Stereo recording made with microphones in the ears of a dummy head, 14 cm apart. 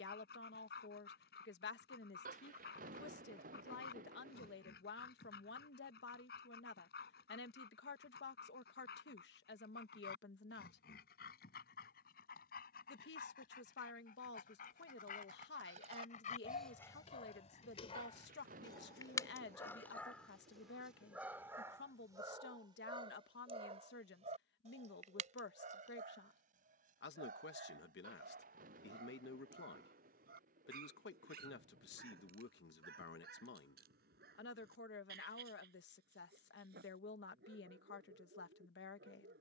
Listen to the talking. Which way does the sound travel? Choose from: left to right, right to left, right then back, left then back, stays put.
stays put.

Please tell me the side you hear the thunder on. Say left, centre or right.
right.